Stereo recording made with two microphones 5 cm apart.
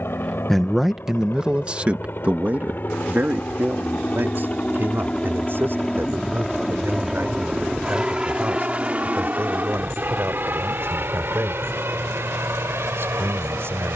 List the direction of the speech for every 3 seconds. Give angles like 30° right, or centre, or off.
20° right, 50° right, 60° right, 60° right, 60° right.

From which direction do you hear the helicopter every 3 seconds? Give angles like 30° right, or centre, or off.
50° left, 30° left, 10° right, 40° right, 60° right.